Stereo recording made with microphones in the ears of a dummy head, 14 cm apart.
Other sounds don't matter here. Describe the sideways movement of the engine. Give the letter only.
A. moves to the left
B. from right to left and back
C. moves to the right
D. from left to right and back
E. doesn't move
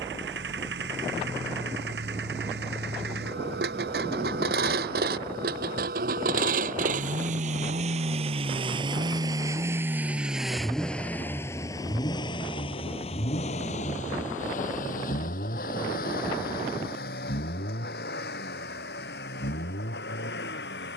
A.